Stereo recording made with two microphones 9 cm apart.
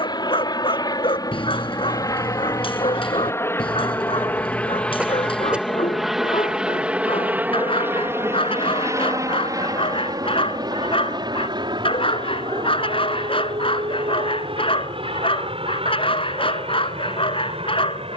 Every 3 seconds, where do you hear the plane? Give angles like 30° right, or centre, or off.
40° left, 20° left, 20° right, 40° right, 50° right, 60° right.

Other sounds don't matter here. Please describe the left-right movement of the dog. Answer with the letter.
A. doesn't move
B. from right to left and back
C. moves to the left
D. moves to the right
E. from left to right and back
A.